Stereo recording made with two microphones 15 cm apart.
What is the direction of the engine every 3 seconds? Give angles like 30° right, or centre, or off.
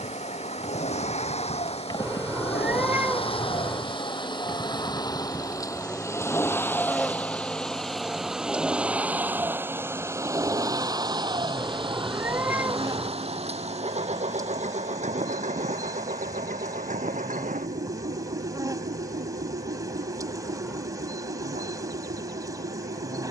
50° left, 30° left, 10° left, 20° right, 40° right, 60° right, 70° right, 70° right.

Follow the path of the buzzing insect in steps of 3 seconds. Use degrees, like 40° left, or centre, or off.
40° left, 10° left, centre, 20° right, 20° right, 20° right, 20° right, 20° right.